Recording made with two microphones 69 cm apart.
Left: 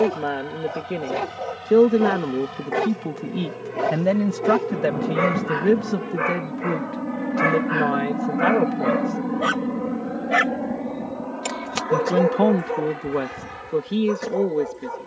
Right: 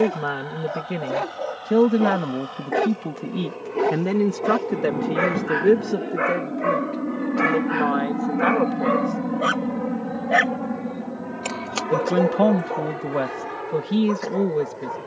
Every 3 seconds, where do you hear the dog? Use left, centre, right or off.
left, centre, centre, left, left.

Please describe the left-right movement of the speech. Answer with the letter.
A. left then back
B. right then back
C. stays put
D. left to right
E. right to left
A.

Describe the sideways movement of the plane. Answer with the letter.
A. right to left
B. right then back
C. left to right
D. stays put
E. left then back
C.